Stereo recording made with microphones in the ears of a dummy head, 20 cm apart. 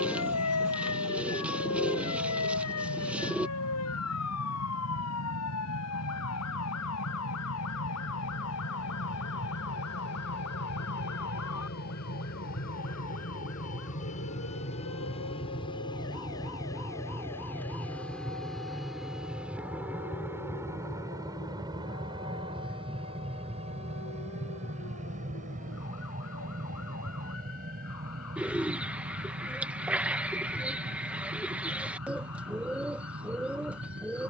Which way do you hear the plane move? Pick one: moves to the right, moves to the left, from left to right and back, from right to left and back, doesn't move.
moves to the right.